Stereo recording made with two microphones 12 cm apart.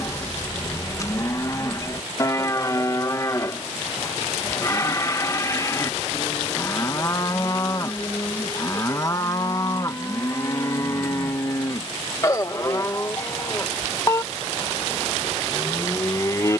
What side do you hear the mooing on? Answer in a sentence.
In this clip you hear the mooing on the left.